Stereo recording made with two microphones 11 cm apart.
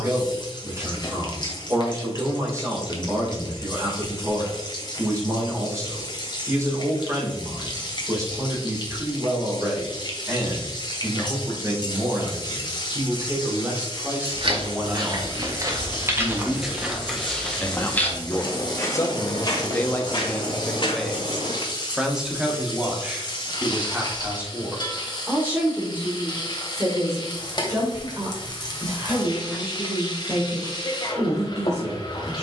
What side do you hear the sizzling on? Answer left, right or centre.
left.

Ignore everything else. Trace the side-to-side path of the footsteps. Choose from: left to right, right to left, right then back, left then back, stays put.
right to left.